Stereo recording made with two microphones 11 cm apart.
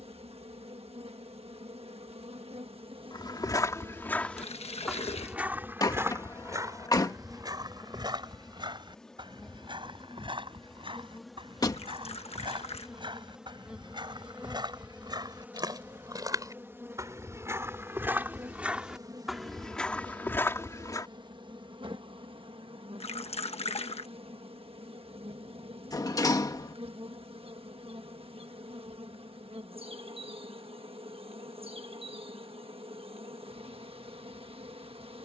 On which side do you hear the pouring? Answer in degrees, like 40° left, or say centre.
70° left.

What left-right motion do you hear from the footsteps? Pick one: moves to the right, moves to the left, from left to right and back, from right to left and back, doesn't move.
from left to right and back.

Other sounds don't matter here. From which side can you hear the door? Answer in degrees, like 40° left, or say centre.
30° left.